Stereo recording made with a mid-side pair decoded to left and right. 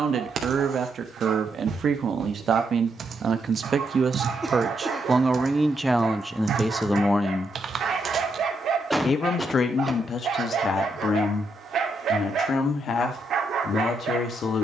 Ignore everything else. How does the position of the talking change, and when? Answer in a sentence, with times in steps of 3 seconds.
You can hear the talking on the right from 0 s, in the centre from 6 s and on the left from 9 s.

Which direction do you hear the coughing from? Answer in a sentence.
In this clip you hear the coughing in the centre.